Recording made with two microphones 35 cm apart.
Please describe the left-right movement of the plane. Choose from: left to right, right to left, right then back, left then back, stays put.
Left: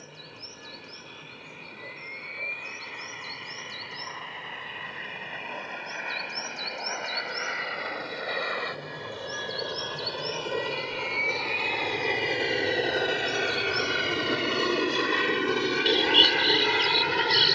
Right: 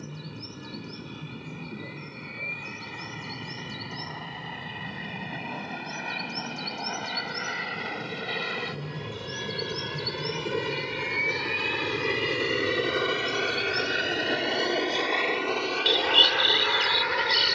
right to left.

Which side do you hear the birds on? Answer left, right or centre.
centre.